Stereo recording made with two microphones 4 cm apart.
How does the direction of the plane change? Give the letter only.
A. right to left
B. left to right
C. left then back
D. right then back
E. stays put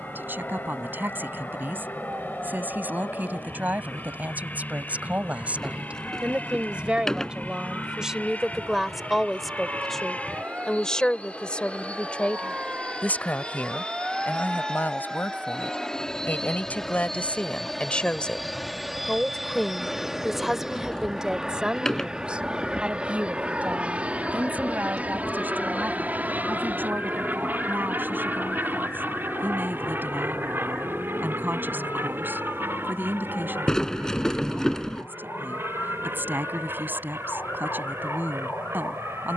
B.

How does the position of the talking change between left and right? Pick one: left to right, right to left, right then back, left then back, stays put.
left then back.